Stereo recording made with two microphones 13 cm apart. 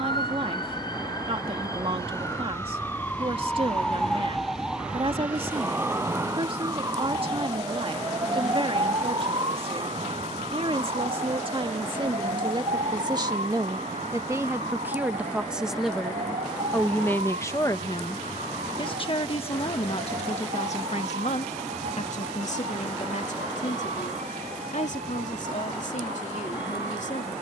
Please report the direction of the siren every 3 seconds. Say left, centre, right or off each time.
left, centre, right, right, right, right, right, right, right.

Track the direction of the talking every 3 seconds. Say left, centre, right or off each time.
right, right, right, right, right, centre, left, left, left.